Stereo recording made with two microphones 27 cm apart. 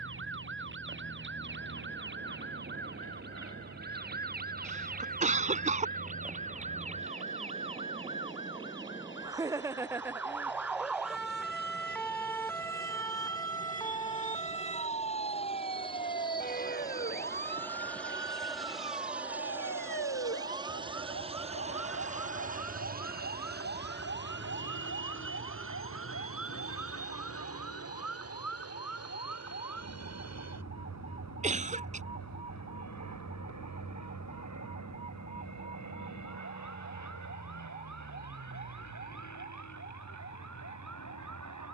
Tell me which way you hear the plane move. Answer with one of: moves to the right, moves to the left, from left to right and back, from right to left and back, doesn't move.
moves to the right.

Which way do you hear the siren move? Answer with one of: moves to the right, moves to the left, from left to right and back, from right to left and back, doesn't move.
moves to the left.